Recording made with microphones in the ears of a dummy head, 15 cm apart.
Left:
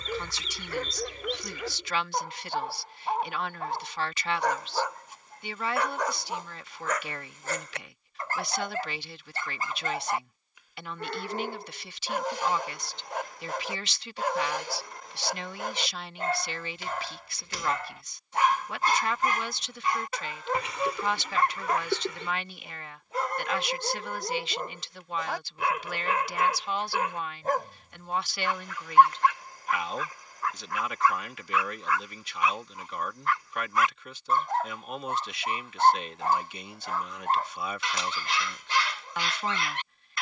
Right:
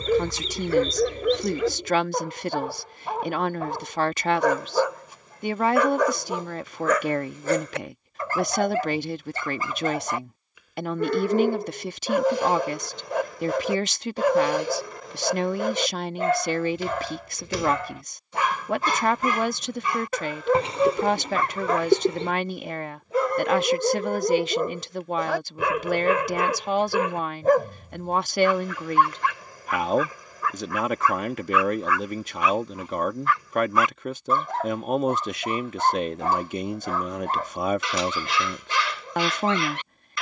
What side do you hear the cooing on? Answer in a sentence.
You can hear the cooing on the right.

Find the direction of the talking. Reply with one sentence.
In this clip you hear the talking on the right.